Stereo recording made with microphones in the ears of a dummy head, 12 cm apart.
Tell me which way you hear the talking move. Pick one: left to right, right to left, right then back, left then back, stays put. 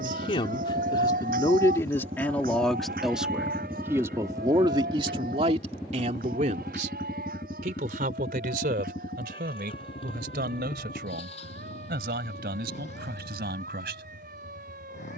left to right.